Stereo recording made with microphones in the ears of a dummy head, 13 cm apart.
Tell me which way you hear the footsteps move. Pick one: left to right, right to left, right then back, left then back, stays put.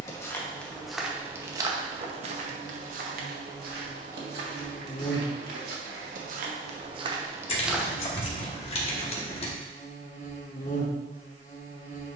right then back.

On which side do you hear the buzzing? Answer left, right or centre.
left.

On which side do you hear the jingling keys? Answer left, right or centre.
left.